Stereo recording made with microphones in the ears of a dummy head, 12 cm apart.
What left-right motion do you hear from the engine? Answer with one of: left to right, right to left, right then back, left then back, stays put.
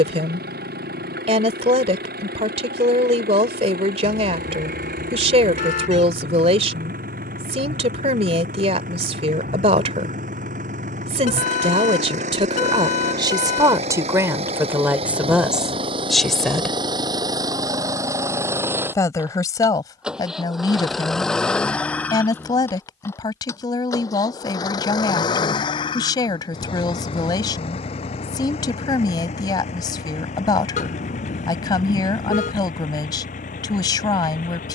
right to left.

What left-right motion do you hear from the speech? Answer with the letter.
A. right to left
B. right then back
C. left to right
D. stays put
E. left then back
A.